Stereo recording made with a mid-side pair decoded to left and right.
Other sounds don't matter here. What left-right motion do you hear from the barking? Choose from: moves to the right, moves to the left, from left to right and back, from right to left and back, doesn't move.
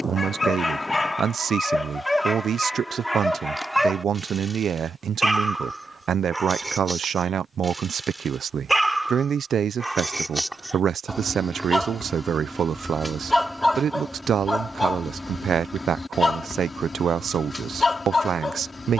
from left to right and back.